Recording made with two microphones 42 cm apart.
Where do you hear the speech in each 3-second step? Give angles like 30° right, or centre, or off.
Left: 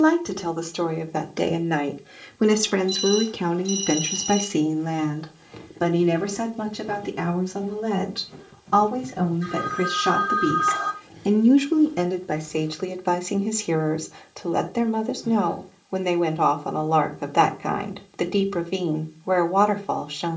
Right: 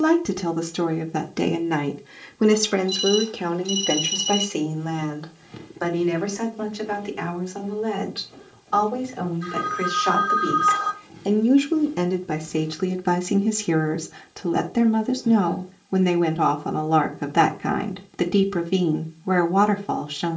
20° right, 30° left, 60° left, 40° left, 30° right, 30° right, 30° right.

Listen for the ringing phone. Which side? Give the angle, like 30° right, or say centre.
70° left.